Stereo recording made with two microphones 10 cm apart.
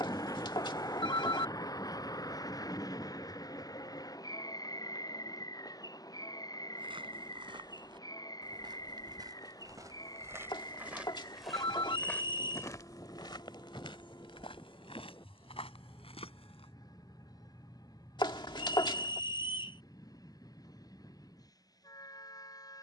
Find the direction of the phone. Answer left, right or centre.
left.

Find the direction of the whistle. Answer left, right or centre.
left.